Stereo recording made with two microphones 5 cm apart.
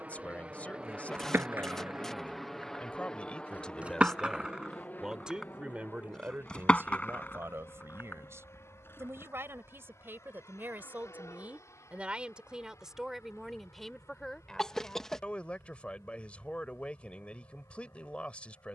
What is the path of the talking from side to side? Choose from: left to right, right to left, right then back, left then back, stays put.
right then back.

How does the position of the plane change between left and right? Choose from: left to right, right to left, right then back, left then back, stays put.
right to left.